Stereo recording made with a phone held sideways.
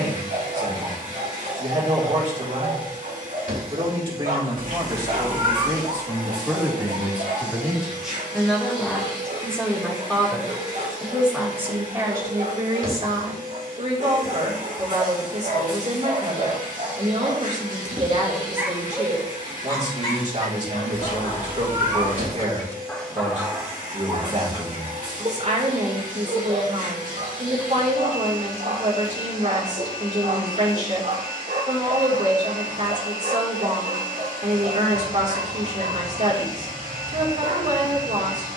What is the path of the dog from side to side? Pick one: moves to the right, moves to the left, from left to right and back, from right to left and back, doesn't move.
from right to left and back.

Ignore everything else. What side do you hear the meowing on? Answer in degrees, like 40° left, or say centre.
60° right.